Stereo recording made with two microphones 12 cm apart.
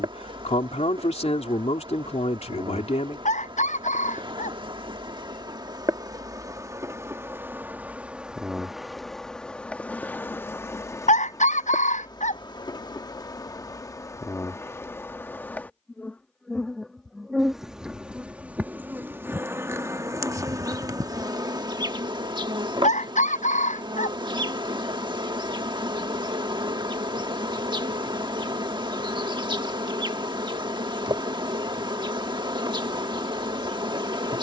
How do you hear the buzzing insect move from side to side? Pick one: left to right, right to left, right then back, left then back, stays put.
left then back.